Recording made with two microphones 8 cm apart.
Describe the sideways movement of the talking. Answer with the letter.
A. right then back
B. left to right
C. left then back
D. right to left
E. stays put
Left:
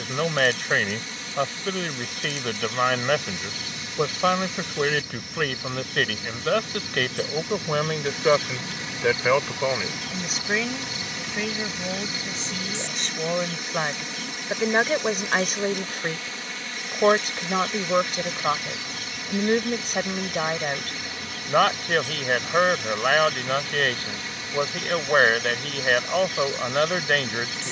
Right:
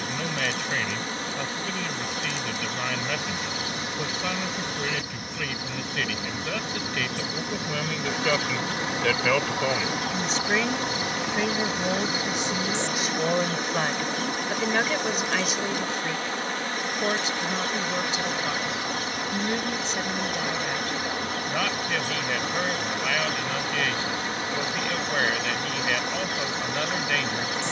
A.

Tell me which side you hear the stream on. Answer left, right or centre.
right.